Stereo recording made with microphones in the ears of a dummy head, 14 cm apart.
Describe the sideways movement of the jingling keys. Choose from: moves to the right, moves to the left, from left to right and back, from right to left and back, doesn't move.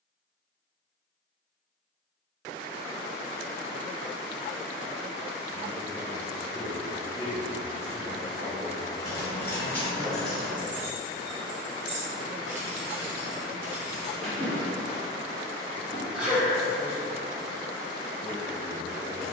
from left to right and back.